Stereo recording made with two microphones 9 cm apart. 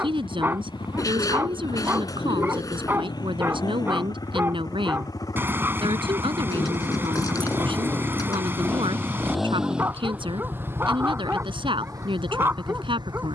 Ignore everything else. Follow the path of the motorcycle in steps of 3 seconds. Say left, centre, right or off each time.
left, left, left, right, right.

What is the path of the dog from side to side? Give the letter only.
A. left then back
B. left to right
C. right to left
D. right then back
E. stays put
E.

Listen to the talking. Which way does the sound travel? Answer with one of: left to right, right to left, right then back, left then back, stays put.
stays put.